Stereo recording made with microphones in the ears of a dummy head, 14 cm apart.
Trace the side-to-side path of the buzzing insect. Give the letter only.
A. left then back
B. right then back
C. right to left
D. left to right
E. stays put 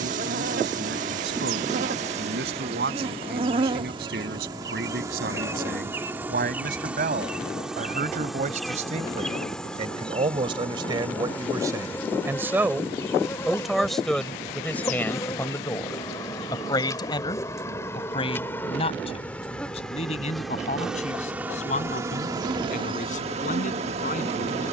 A.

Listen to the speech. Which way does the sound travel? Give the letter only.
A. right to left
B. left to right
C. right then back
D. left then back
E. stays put
A.